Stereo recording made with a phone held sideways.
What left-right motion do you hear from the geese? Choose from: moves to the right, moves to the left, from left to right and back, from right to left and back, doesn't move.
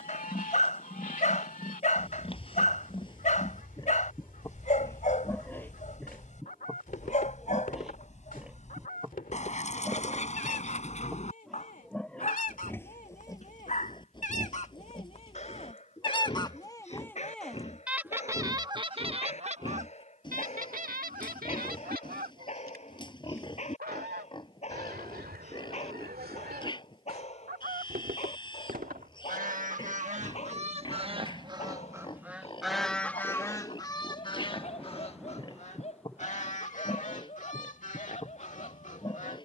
from left to right and back.